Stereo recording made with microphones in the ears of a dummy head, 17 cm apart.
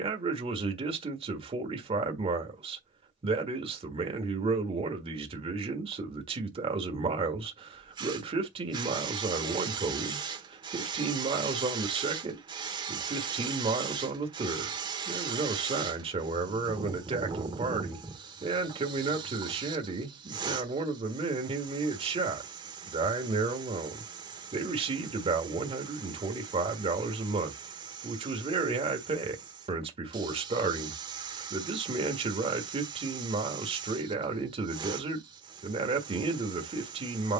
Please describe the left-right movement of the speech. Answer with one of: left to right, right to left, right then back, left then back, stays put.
stays put.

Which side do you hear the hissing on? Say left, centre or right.
right.